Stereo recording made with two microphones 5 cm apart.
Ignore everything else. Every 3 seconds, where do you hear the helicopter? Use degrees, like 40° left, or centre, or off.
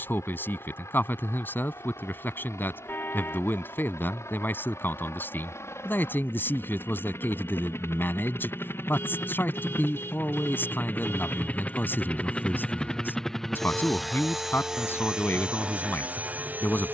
70° left, 60° left, 60° left, 40° left, 10° left, 30° right.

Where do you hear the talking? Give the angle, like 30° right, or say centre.
40° left.